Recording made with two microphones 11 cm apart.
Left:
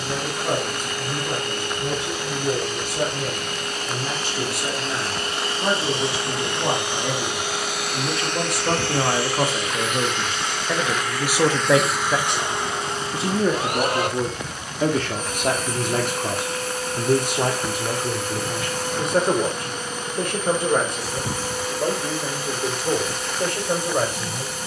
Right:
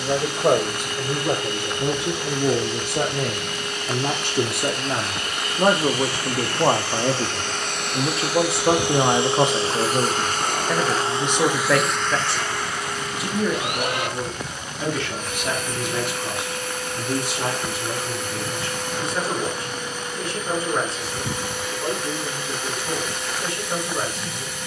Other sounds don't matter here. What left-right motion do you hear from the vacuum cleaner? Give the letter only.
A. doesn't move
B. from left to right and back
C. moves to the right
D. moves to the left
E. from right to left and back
B.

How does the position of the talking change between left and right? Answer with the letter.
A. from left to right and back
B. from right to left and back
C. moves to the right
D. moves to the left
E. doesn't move
D.